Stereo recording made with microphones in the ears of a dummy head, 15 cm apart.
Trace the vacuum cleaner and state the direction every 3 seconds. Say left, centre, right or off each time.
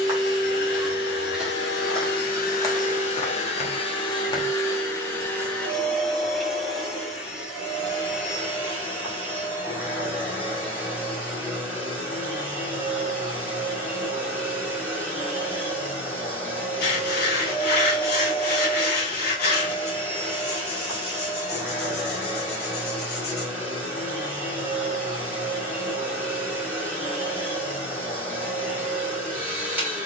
left, left, centre, centre, centre, centre, centre, centre, centre, centre.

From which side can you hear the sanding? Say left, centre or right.
left.